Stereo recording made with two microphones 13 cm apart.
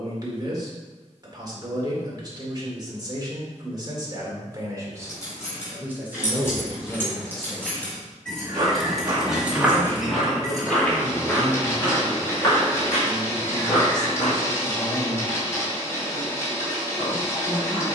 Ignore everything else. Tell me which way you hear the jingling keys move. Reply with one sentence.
In this clip you hear the jingling keys travel towards the right.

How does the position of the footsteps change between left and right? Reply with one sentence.
You can hear the footsteps move from right to left.